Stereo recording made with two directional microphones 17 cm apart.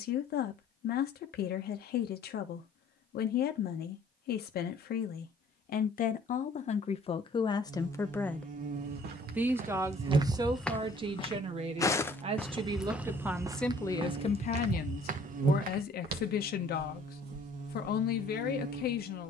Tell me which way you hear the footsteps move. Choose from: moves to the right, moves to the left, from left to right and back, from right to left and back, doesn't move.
from right to left and back.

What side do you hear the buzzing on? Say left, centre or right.
right.